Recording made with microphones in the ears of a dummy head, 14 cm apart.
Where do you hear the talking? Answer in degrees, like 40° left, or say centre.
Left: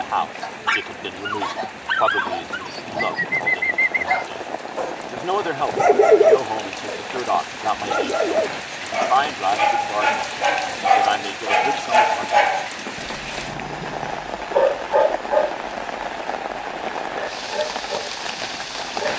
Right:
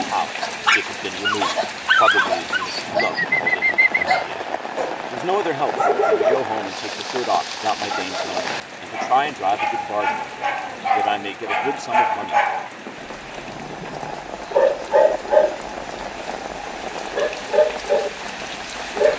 20° right.